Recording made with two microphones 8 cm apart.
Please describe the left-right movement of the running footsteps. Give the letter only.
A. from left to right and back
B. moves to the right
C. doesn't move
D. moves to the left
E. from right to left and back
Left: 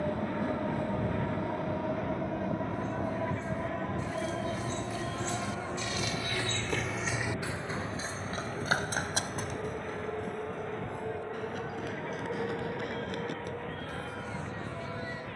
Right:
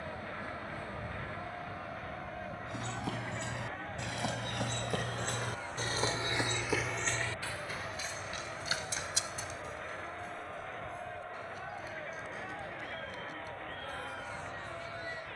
D.